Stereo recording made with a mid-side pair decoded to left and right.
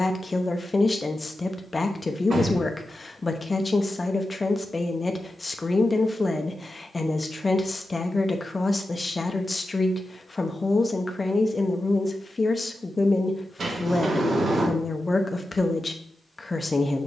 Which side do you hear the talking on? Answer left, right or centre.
left.